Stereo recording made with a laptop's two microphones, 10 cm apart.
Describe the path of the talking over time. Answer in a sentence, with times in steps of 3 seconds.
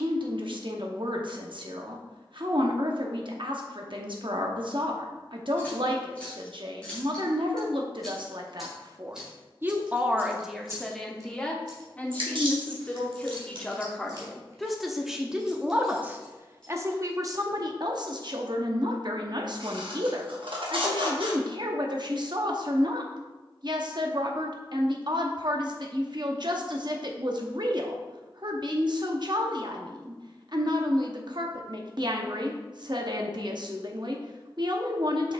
In this clip you hear the talking on the right from 0 s, in the centre from 9 s and on the right from 15 s.